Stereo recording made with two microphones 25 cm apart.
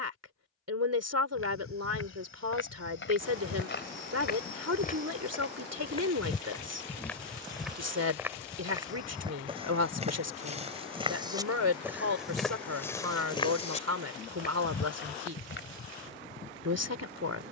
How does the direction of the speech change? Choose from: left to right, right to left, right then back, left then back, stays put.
stays put.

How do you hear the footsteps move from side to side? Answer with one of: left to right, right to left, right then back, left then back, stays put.
right then back.